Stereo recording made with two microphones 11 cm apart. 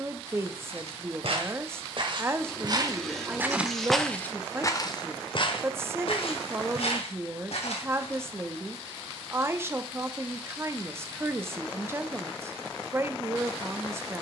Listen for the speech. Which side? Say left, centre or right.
right.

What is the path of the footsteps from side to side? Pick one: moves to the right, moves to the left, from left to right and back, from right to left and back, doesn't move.
moves to the left.